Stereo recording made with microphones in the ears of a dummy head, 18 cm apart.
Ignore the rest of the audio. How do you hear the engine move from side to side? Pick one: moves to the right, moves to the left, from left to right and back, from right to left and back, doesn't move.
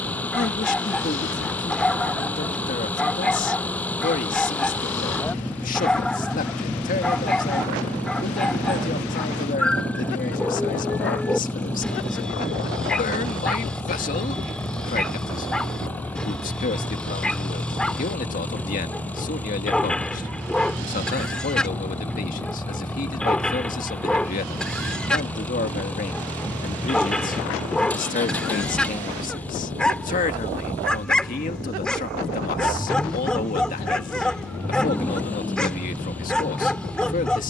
doesn't move.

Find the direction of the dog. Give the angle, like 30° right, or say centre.
centre.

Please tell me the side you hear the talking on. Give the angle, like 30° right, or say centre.
40° left.